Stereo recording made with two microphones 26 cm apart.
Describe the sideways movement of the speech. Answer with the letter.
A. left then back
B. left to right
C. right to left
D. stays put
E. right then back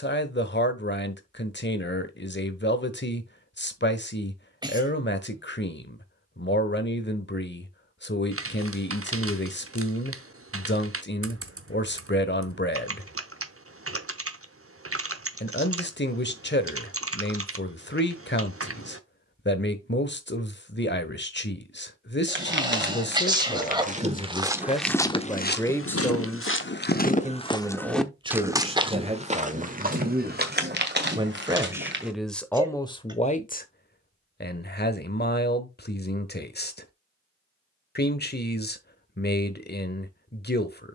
E.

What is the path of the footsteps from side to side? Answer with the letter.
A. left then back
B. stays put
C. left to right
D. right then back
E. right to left
A.